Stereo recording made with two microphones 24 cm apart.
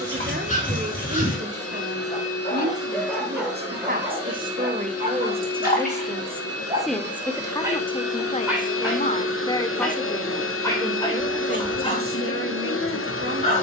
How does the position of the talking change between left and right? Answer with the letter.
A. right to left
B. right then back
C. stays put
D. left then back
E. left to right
D.